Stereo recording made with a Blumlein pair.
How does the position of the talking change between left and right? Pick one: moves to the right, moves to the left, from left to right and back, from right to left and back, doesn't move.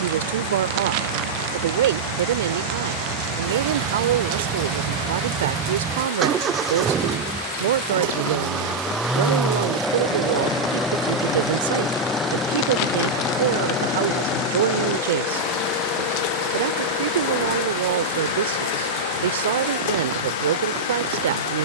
doesn't move.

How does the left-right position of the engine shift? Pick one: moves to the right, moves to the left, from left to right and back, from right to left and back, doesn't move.
moves to the left.